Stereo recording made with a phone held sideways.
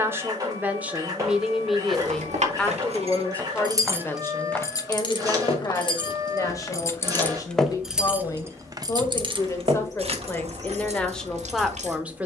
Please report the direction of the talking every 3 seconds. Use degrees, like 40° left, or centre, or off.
10° right, 20° left, 30° left, 10° left.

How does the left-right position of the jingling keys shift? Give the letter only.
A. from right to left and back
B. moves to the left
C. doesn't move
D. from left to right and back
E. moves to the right
A.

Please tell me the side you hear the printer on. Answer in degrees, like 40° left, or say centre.
30° right.